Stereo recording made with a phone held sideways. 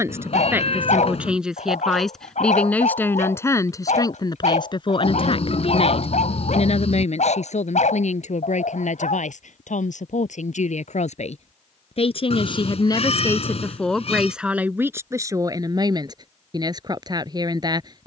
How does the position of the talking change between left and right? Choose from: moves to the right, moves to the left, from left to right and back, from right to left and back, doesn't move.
from right to left and back.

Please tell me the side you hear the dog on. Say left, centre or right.
left.